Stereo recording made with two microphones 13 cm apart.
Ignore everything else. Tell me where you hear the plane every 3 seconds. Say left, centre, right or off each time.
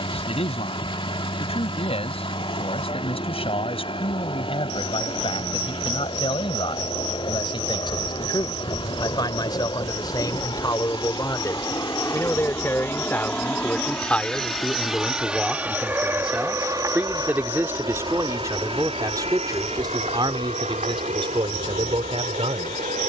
left, left, left, left, centre, right, right, right.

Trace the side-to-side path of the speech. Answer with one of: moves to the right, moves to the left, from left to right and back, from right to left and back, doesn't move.
moves to the right.